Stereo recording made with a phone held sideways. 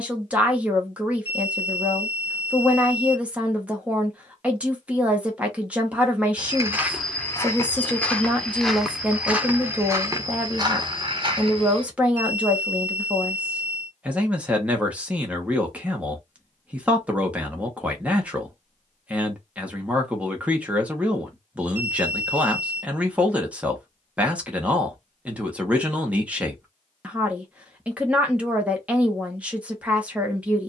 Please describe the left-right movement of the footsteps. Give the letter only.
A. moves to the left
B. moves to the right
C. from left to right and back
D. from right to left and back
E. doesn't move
D.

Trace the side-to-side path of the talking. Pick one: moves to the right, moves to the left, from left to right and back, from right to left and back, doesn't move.
doesn't move.